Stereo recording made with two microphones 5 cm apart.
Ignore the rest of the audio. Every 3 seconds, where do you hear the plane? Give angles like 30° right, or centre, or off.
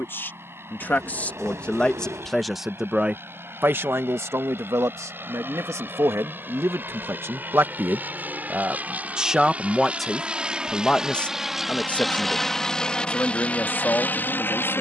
50° right, 50° right, 40° right, 20° right, 20° left.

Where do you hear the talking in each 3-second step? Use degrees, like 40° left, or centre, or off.
20° left, 60° right, 50° right, 10° left, 40° left.